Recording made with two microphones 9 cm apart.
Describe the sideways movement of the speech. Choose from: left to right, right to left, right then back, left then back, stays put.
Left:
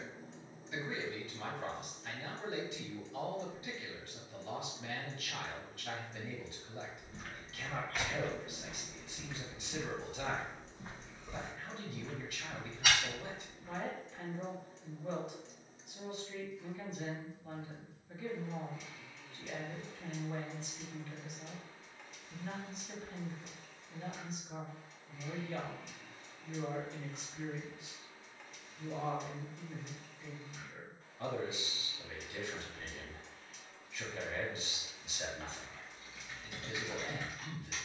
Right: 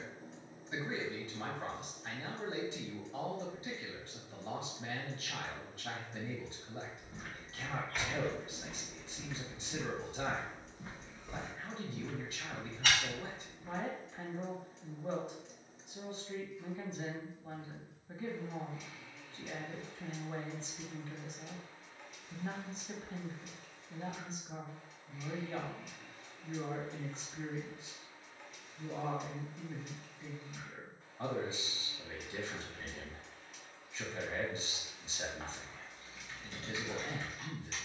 stays put.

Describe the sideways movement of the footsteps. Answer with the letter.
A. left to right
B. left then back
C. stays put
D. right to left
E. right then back
B.